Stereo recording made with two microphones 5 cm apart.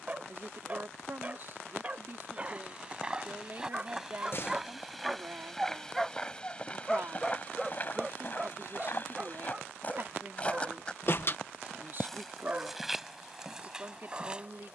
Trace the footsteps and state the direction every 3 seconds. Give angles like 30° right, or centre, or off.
20° right, 10° right, 30° left, 20° left, 10° right.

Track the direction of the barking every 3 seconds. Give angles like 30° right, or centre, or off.
20° right, 10° right, centre, 20° right, 30° right.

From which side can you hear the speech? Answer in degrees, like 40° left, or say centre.
40° right.